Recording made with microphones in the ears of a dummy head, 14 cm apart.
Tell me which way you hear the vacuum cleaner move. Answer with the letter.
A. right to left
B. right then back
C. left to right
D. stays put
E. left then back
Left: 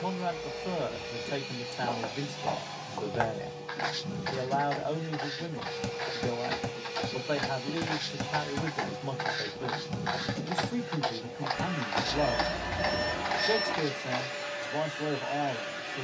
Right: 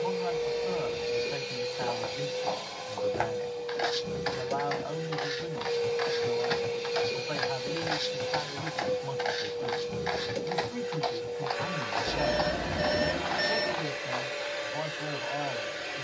D.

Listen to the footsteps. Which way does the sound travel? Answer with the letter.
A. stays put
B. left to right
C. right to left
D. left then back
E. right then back
E.